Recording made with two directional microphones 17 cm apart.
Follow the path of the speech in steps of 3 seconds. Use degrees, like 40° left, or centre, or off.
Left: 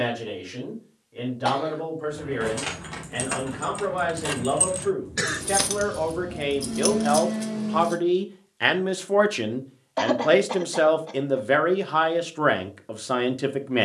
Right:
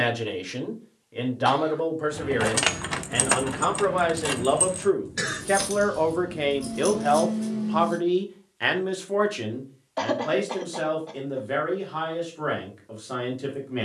40° right, 30° right, centre, 50° left, 50° left.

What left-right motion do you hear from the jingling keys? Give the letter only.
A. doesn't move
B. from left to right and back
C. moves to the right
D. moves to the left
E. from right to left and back
D.